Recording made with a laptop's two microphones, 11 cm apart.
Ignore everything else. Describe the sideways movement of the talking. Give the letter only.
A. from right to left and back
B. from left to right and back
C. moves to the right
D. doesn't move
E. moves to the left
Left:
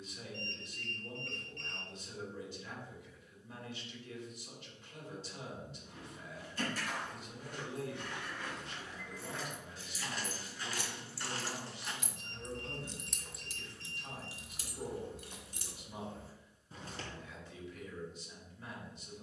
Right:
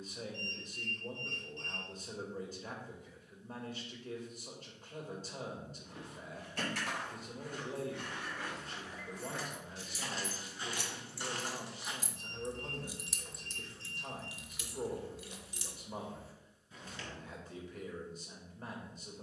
D.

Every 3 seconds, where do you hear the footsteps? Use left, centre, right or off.
off, off, right, right, centre, left, off.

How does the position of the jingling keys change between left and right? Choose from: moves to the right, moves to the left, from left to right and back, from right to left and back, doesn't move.
moves to the left.